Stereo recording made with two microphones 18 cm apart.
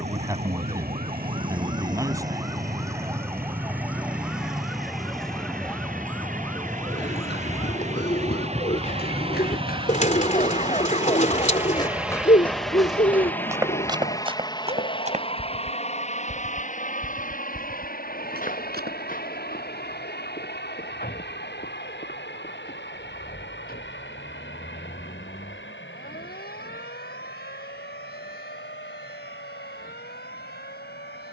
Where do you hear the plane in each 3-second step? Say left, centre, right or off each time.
right, right, right, right, centre, left, left, left, left, left, left.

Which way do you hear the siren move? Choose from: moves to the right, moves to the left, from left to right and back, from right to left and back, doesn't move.
moves to the left.